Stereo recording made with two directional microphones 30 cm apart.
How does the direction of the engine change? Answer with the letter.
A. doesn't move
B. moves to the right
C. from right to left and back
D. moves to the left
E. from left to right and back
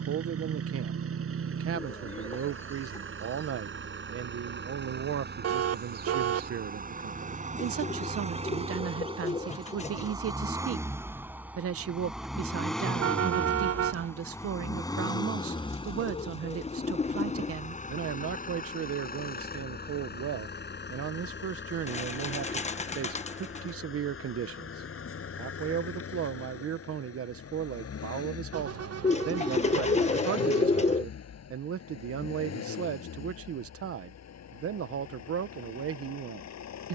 D.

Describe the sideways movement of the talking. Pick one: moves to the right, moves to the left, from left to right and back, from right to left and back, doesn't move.
doesn't move.